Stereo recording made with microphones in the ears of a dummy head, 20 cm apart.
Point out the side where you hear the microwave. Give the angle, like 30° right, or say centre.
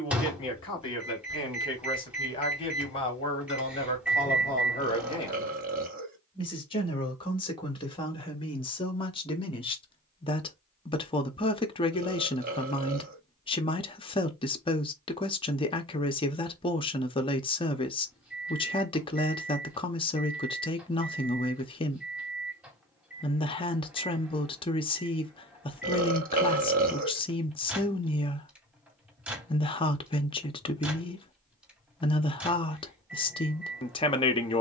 10° right.